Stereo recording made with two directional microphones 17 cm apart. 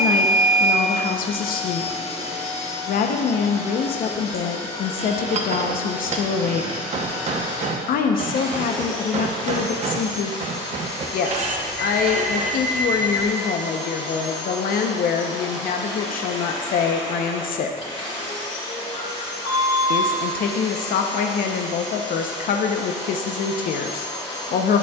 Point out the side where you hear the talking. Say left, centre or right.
left.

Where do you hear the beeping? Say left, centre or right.
left.